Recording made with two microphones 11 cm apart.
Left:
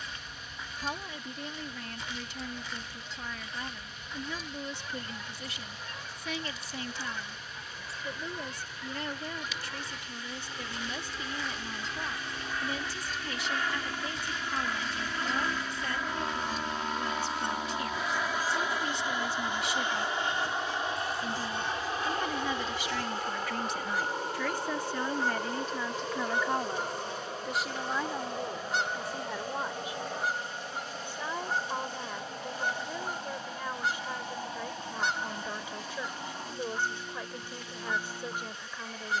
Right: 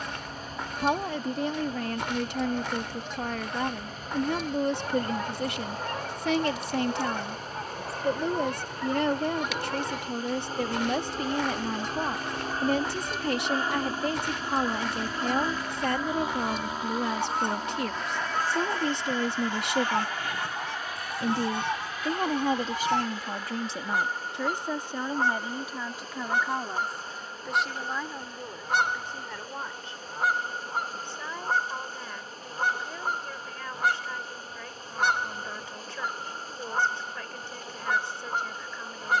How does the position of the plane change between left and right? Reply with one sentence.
In this clip you hear the plane move to the left.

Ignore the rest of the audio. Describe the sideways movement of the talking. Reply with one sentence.
You can hear the talking go from the right side to the left.